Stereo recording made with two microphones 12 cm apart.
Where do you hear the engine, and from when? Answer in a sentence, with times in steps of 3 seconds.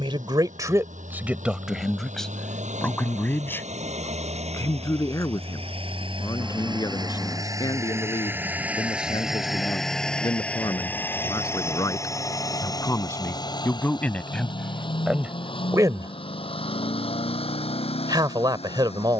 You can hear the engine on the right from 0 s, in the centre from 9 s and on the left from 12 s.